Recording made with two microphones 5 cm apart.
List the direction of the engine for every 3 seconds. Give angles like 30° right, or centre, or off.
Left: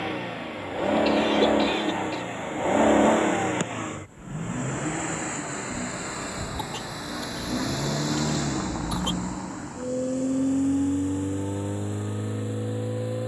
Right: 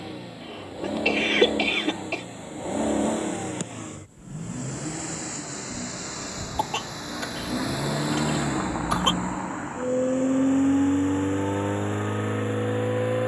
60° left, 40° left, centre, 40° right, 50° right.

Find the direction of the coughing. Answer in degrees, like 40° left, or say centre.
80° right.